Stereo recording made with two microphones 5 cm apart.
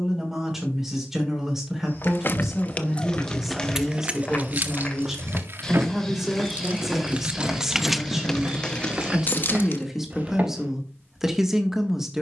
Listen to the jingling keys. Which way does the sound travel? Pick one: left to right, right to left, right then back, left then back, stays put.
right then back.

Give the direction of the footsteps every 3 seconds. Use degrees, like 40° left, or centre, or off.
40° left, 20° left, 10° right, 30° right.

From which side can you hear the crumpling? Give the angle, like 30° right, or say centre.
20° left.